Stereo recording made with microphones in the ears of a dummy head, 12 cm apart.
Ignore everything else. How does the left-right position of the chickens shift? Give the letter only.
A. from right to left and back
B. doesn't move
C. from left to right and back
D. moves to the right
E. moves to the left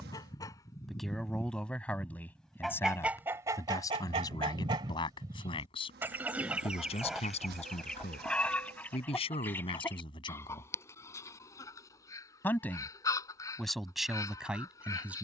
C.